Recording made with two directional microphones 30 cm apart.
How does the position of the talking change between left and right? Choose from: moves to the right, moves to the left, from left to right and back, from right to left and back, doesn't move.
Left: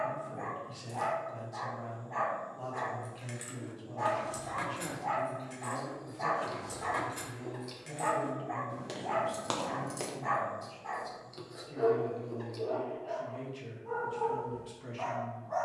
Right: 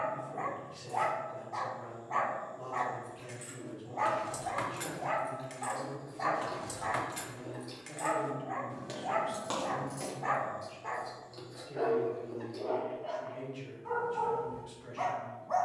from left to right and back.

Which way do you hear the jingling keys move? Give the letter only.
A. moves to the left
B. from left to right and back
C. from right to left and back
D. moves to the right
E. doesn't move
B.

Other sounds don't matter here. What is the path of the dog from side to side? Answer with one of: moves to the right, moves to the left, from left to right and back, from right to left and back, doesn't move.
from right to left and back.